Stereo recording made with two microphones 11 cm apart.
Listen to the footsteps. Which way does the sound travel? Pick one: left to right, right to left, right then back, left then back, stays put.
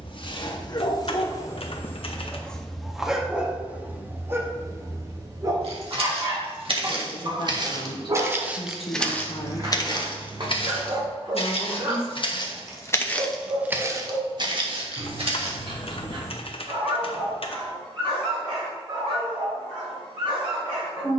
left then back.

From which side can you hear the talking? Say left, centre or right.
left.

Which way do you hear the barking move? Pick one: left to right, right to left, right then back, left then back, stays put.
left to right.